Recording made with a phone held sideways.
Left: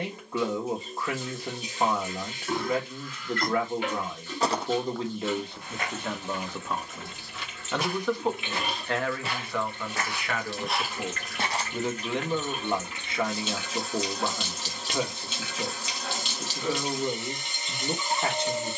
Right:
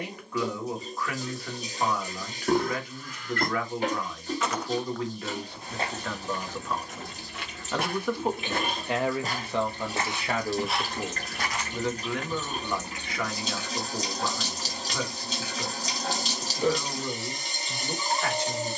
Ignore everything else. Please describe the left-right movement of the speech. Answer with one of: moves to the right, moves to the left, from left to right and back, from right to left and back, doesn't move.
from left to right and back.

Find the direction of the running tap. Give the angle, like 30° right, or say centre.
40° right.